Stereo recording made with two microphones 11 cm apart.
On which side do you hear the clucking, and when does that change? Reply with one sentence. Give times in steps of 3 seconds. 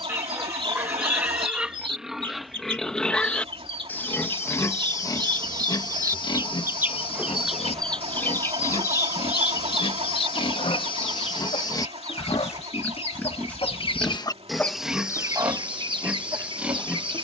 You can hear the clucking on the right from 0 s, in the centre from 6 s, on the left from 9 s and on the right from 15 s.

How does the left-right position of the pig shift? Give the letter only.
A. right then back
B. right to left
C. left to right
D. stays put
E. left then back
E.